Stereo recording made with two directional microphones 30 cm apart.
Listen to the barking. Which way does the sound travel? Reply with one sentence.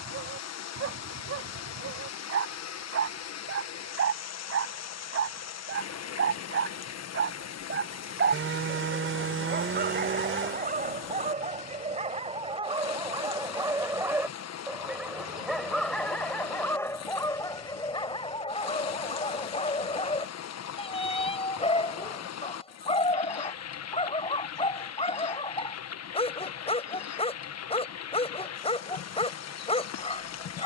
In this clip you hear the barking go from the right side to the left.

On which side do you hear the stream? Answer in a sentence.
You can hear the stream on the left.